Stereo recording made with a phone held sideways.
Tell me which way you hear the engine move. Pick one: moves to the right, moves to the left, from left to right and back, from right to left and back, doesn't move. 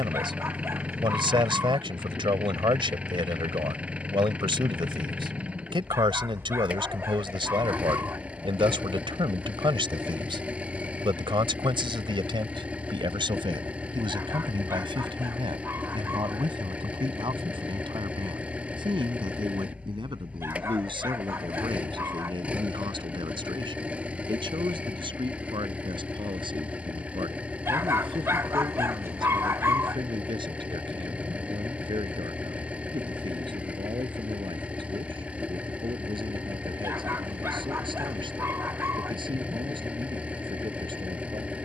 doesn't move.